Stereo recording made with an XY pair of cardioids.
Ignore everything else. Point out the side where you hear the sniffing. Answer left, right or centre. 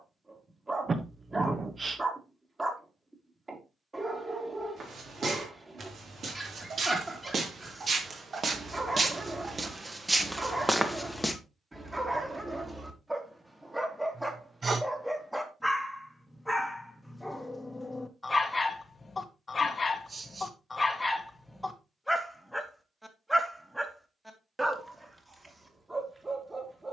right.